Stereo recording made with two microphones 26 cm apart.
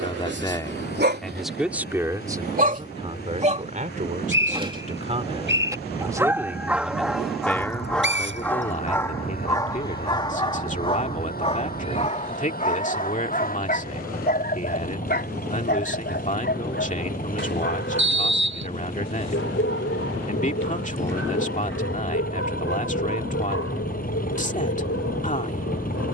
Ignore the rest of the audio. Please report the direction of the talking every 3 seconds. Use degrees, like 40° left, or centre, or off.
centre, 30° right, 10° left, 30° left, 30° left, 30° left, 30° left, 30° left, 30° left.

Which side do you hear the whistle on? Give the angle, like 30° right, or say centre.
50° right.